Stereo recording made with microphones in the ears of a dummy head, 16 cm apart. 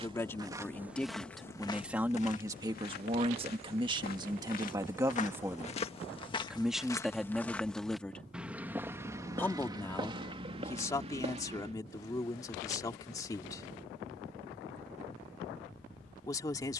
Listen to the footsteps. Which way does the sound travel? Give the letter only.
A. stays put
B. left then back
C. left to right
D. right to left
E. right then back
B.